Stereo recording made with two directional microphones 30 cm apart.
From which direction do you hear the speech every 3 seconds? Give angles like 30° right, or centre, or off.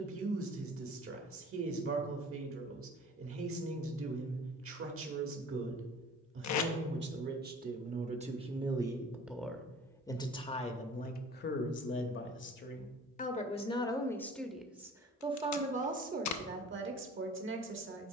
50° right, 50° right, 30° right, 20° left, 20° left, 30° right.